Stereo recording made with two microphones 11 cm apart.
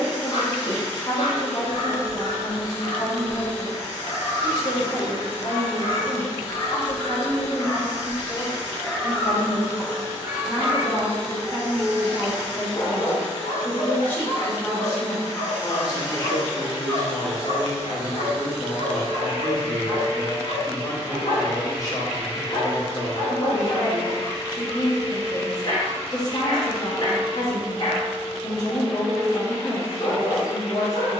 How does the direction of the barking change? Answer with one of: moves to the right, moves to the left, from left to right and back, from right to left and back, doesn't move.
from left to right and back.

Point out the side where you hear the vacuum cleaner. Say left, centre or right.
left.